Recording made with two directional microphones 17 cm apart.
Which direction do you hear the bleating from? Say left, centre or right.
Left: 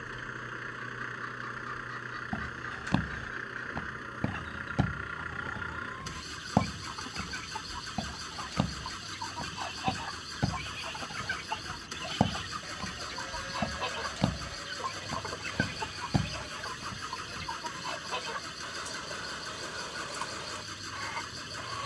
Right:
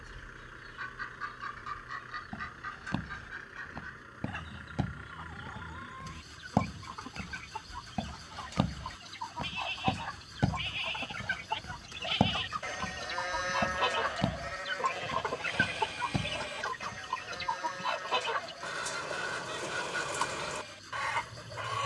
right.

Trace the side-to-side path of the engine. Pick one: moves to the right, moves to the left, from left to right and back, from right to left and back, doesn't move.
doesn't move.